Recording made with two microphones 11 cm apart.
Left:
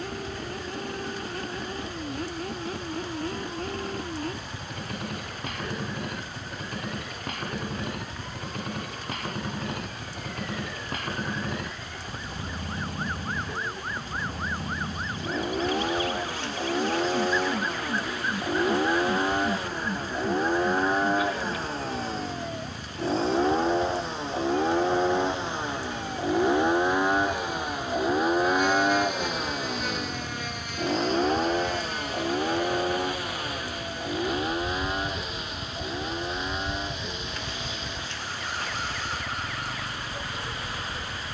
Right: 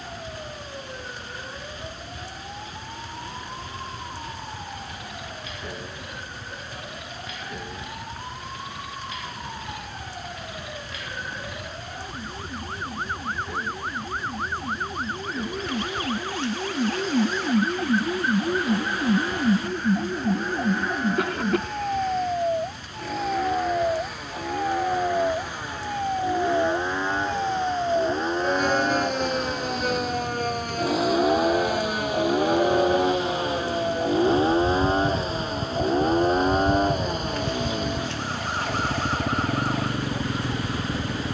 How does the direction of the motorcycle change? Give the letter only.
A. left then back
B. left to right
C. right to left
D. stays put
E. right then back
B.